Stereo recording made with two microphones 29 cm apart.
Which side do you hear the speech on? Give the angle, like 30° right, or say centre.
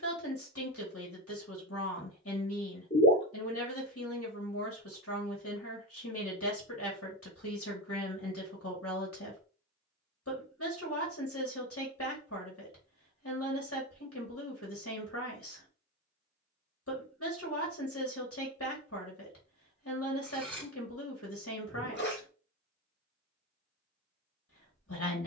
50° left.